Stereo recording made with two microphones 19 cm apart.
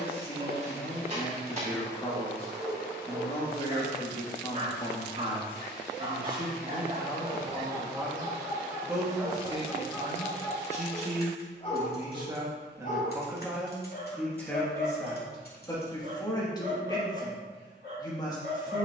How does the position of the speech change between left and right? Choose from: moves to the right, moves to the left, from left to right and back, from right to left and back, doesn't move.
from left to right and back.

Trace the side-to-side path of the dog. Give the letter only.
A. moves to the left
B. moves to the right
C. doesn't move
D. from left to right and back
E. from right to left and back
A.